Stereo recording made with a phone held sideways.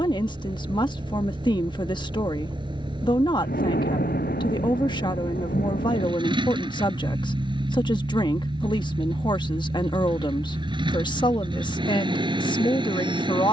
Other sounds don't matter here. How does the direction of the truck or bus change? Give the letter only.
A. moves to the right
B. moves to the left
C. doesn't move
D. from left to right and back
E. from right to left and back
C.